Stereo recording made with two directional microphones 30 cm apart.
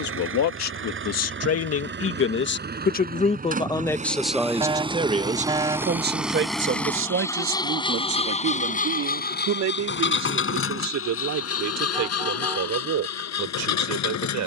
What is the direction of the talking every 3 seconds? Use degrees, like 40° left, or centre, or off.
50° left, centre, 50° right, 60° right, 70° right.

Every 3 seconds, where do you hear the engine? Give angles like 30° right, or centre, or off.
40° right, 20° right, 10° left, 40° left, 60° left.